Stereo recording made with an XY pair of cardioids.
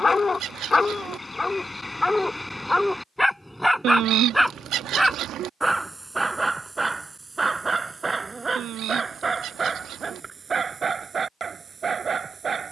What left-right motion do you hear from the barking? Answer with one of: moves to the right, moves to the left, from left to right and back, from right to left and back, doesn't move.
moves to the right.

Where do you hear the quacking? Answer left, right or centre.
right.